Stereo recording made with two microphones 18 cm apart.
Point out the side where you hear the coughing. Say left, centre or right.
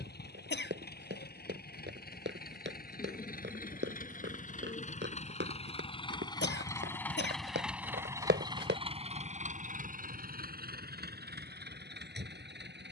left.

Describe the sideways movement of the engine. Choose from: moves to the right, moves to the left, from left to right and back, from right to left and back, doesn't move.
moves to the right.